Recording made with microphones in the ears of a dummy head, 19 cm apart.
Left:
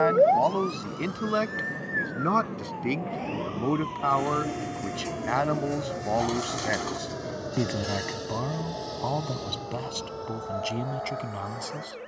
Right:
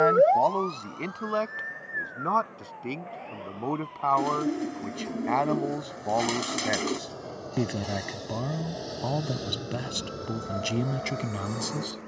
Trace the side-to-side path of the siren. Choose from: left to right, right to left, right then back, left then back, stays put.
right to left.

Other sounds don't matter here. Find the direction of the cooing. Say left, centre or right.
right.